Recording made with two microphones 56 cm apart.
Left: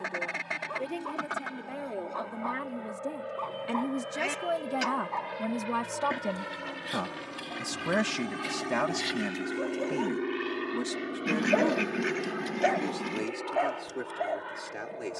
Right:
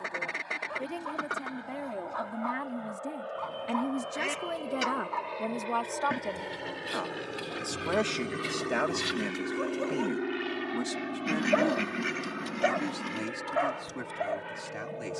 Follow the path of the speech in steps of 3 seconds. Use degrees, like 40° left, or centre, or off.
20° right, 20° left, 40° left, centre, 30° right.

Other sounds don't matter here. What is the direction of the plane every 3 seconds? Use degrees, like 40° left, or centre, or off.
60° left, 50° left, 20° left, 10° right, 40° right.